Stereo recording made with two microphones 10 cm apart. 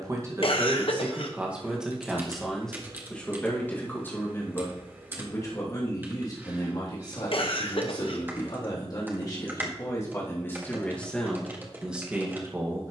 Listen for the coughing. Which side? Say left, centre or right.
left.